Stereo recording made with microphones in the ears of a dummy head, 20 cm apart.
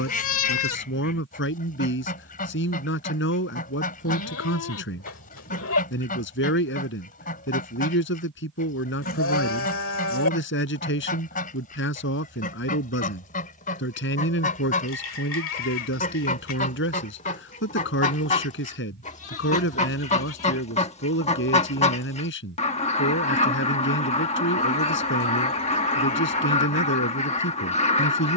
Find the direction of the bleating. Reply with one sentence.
In this clip you hear the bleating on the left.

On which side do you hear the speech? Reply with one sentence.
You can hear the speech on the left.